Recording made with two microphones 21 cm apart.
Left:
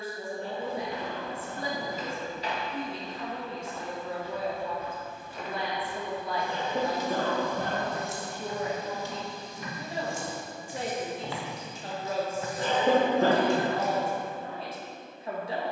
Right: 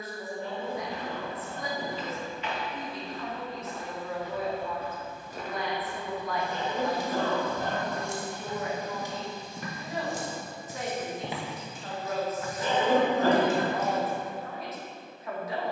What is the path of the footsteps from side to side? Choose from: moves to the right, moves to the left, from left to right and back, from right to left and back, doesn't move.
from left to right and back.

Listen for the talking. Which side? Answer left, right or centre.
left.